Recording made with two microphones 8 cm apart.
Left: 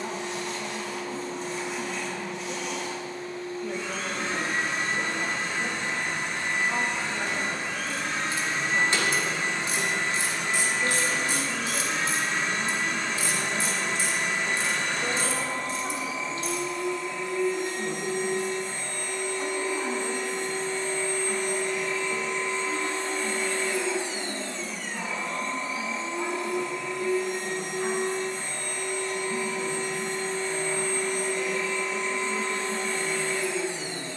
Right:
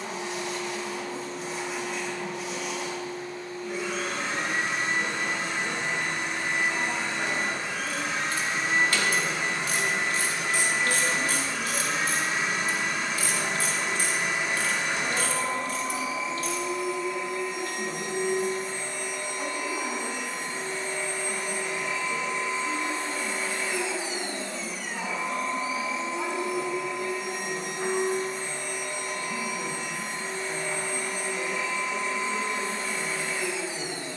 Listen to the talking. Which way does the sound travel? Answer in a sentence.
You can hear the talking move from left to right.